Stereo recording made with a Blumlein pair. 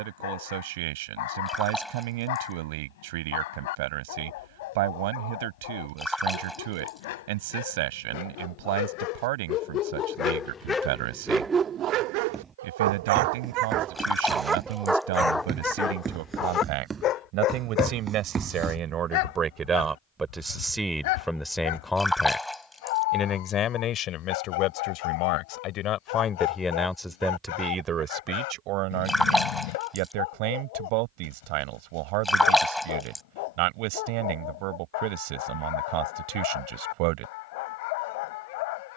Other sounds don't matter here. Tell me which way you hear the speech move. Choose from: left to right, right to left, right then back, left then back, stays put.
left then back.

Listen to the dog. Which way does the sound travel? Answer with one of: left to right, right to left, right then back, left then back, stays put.
right then back.